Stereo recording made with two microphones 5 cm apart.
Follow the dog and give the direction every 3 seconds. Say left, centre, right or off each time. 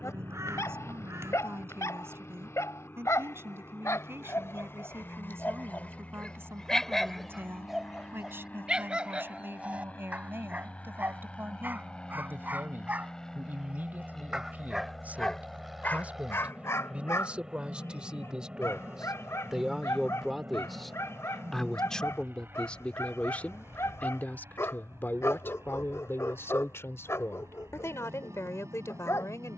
left, left, centre, right, right, left, left, left, left, left.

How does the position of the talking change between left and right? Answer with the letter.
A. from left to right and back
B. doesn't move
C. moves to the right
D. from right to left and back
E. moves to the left
E.